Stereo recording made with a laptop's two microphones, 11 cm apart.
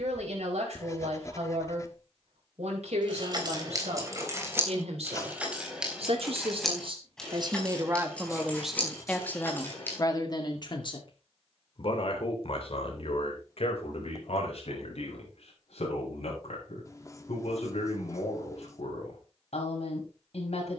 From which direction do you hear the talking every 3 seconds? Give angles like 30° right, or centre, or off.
80° right, 70° right, 30° right, 40° left, 60° left, 70° left, 70° left.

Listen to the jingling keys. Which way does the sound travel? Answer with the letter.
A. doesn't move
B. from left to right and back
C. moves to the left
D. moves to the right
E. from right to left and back
C.